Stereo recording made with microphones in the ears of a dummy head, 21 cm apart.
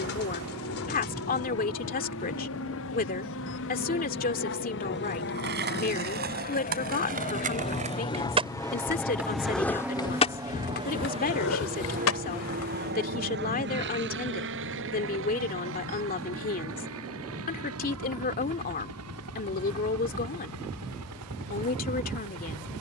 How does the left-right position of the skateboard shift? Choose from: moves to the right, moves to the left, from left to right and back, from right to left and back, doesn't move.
moves to the left.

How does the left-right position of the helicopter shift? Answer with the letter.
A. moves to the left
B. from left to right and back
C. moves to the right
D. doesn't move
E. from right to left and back
C.